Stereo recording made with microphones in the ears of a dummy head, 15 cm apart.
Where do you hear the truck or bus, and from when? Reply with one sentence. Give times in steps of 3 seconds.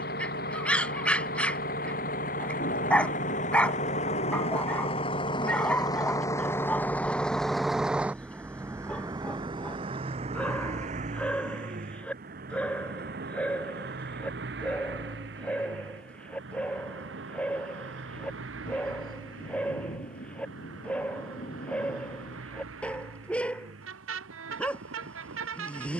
You can hear the truck or bus on the left from 0 s, in the centre from 6 s and on the right from 9 s.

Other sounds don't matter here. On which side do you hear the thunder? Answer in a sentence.
You can hear the thunder on the left.